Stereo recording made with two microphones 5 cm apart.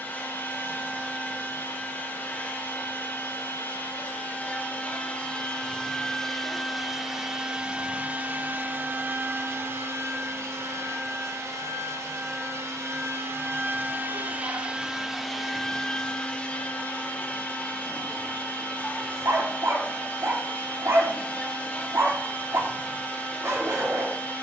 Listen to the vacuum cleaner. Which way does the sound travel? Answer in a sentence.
You can hear the vacuum cleaner go right and come back.